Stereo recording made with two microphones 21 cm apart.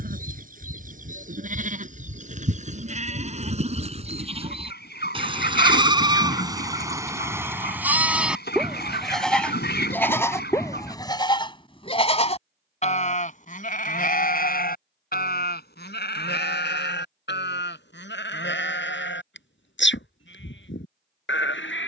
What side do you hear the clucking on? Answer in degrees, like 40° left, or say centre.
60° left.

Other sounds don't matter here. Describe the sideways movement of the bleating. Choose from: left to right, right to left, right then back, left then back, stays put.
right to left.